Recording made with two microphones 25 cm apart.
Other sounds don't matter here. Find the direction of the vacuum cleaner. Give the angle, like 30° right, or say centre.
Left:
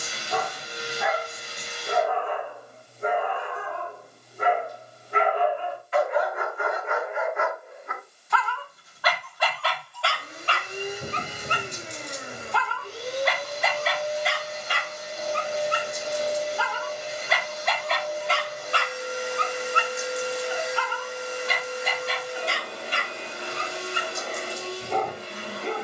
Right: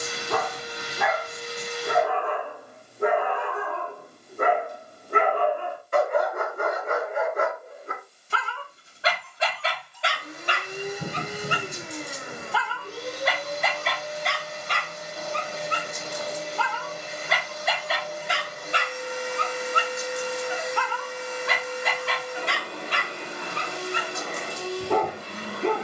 70° right.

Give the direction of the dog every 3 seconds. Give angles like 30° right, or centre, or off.
70° right, 60° right, 40° right, 20° right, centre, centre, 30° right, 70° right, 70° right.